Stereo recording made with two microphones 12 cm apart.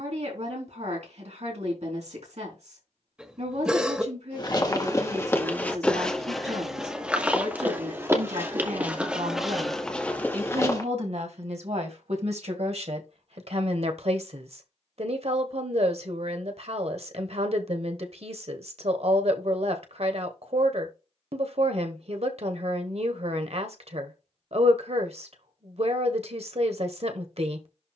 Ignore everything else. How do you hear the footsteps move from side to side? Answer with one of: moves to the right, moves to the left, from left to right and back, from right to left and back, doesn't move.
from left to right and back.